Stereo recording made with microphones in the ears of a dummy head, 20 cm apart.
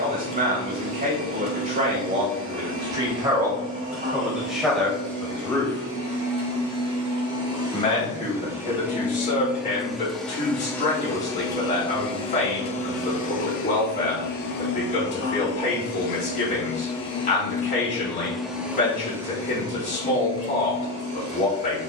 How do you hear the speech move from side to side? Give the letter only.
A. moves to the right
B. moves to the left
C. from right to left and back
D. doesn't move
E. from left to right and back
B.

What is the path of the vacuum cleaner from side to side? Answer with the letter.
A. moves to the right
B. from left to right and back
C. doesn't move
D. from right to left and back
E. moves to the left
D.